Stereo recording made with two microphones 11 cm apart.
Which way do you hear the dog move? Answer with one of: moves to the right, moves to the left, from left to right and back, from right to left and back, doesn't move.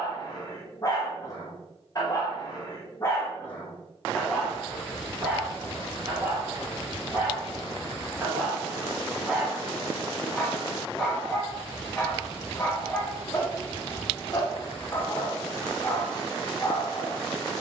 from left to right and back.